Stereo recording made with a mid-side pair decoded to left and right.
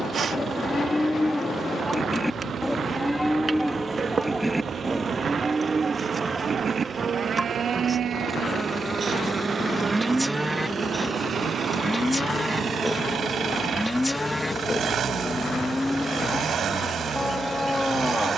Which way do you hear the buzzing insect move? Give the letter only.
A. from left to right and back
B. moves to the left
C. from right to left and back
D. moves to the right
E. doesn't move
B.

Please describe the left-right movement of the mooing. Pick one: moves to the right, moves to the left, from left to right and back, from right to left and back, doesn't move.
from left to right and back.